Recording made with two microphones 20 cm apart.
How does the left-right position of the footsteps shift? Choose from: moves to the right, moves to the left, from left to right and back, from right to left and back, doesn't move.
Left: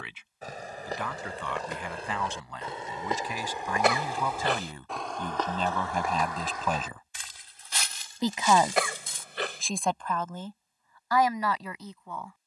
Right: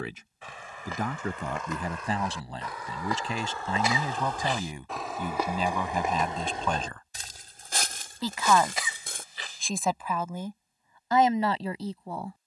moves to the right.